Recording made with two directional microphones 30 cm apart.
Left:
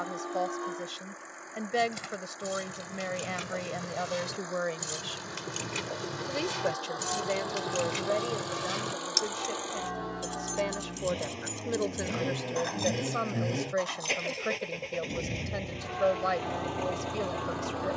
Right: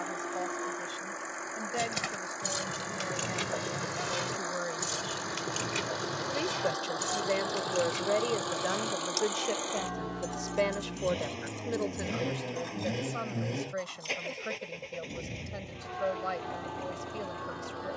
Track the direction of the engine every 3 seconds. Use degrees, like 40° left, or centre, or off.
50° right, 50° right, 30° right, 20° right, 20° left, 50° left.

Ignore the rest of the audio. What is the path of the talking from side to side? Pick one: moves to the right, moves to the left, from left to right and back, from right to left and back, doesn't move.
from left to right and back.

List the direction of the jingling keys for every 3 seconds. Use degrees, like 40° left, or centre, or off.
50° right, 20° right, 20° left, 50° left, 60° left, off.